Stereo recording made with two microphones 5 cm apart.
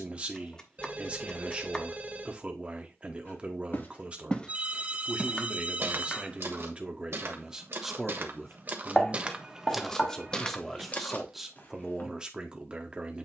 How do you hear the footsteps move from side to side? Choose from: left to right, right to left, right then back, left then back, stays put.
right then back.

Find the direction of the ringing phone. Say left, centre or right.
right.